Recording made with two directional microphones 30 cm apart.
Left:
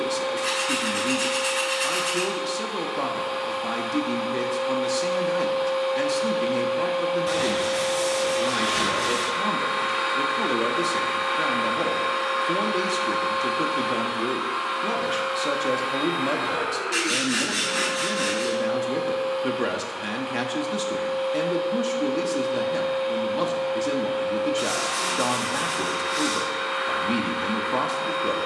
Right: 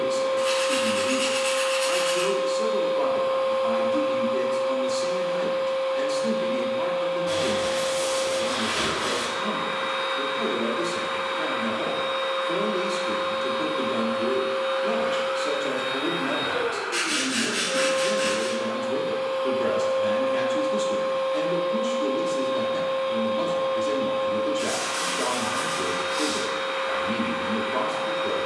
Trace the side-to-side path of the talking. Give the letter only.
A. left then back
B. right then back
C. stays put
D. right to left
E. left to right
C.